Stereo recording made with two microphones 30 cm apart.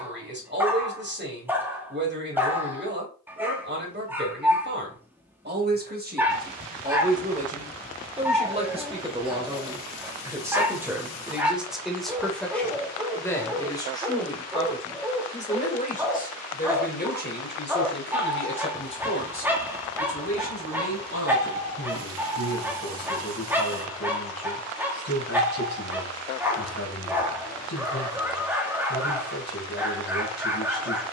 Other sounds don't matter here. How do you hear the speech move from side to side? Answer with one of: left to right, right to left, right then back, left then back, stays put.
right to left.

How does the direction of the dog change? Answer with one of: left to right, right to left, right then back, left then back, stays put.
stays put.